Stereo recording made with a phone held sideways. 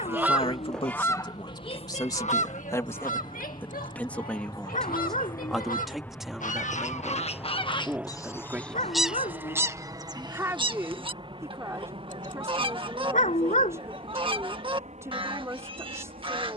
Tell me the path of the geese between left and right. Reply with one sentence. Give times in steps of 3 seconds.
You can hear the geese on the left from 0 s and on the right from 9 s.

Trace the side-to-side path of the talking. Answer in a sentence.
You can hear the talking move from left to right.